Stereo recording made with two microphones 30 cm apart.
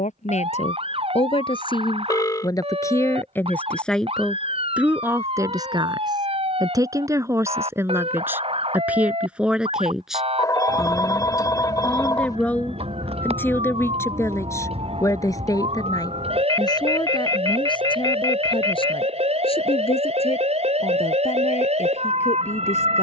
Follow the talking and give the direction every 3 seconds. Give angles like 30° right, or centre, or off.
20° left, centre, 10° right, centre, 10° left, 10° left, 20° left, 20° left.